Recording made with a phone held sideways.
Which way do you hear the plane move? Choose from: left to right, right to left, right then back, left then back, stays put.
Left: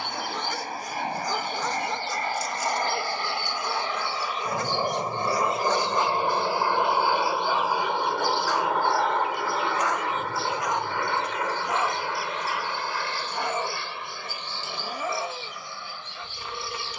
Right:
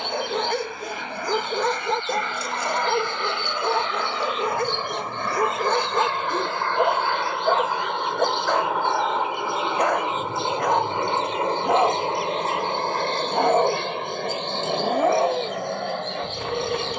left to right.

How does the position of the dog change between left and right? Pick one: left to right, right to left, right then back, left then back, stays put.
stays put.